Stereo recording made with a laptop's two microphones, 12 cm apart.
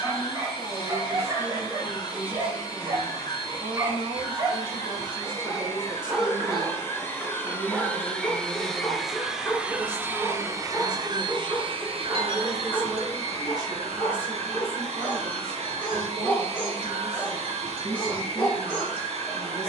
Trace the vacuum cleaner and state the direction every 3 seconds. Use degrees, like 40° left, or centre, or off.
30° left, 30° left, 20° left, 30° right, 60° right, 60° right, 60° right.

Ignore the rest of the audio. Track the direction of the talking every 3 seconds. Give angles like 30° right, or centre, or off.
60° right, 50° right, 20° right, 10° left, 30° right, 60° right, 60° right.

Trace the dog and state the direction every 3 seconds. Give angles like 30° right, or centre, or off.
30° right, 20° right, centre, 10° left, 10° left, 20° left, 20° left.